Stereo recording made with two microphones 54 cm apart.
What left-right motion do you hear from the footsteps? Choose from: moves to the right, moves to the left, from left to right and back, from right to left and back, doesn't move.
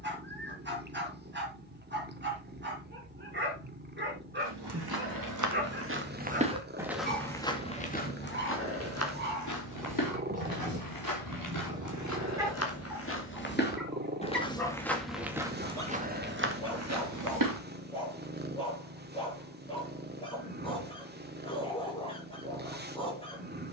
from right to left and back.